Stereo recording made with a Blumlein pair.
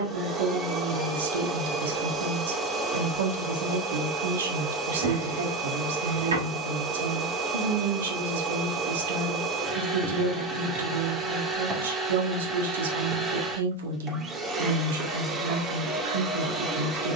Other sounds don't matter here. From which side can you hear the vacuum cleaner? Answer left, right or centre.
right.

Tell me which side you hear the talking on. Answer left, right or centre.
right.